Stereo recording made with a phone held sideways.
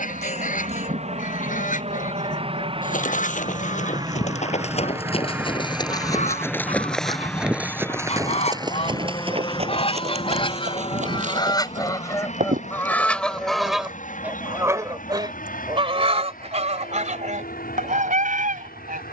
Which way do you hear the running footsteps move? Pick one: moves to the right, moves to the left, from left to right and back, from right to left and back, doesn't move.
moves to the right.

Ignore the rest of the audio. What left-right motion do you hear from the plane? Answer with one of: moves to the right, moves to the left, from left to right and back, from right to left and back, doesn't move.
moves to the left.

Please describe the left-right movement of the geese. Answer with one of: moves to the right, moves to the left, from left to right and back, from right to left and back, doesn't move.
moves to the right.